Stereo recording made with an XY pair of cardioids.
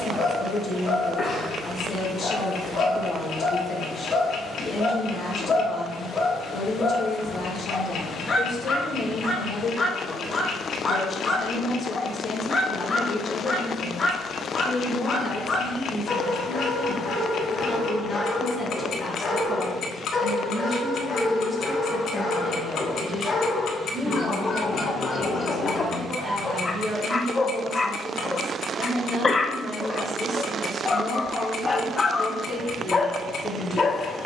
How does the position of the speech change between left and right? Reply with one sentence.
You can hear the speech go from the left side to the right.